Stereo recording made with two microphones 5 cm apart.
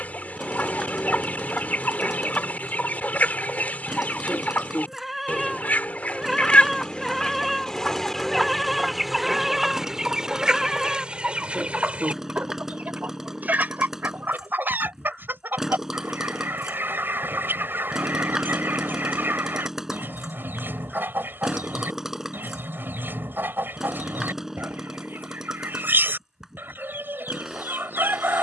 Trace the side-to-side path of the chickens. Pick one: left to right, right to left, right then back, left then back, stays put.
left to right.